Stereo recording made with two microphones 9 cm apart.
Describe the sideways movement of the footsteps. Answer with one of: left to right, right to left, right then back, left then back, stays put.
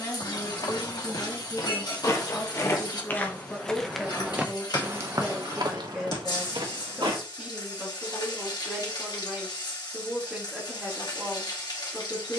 left to right.